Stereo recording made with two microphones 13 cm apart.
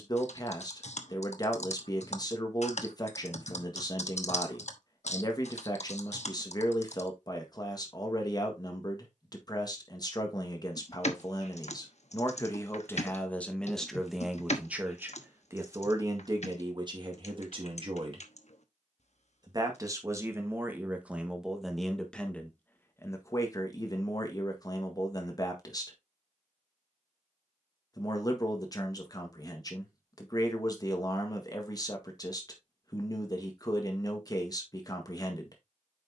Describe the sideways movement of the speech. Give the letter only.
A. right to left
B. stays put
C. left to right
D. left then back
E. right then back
E.